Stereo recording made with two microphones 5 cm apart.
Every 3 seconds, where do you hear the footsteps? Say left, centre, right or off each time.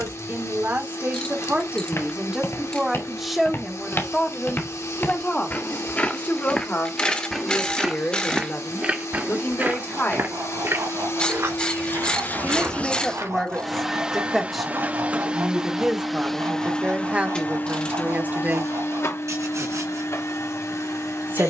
left, left, centre, right, right, off, off.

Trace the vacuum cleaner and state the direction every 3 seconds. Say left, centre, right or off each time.
left, left, left, left, centre, centre, left.